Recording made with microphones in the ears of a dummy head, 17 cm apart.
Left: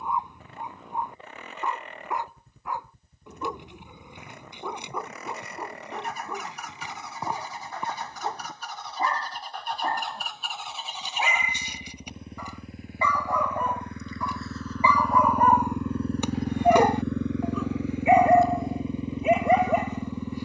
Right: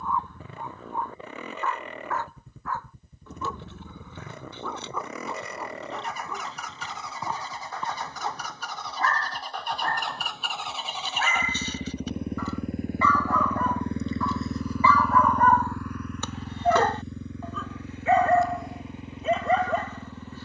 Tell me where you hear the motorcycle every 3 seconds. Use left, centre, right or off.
right, right, right, right, right, left, left.